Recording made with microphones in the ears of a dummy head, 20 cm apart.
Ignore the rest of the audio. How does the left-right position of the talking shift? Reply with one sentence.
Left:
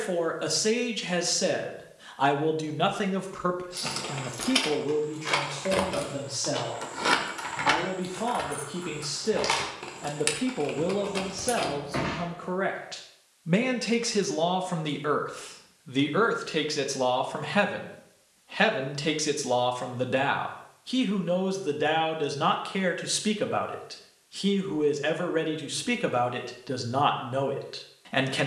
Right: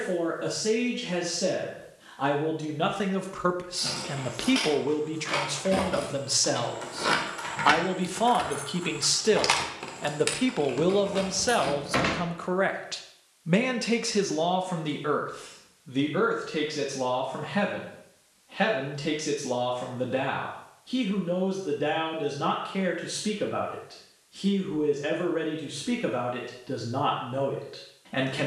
In this clip you hear the talking go right and come back.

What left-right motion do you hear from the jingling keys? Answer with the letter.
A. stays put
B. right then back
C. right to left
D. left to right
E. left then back
B.